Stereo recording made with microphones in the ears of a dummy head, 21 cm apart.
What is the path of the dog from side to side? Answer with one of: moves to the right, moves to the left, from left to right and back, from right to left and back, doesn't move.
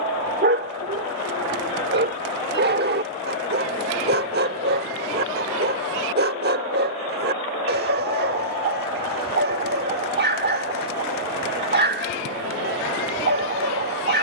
doesn't move.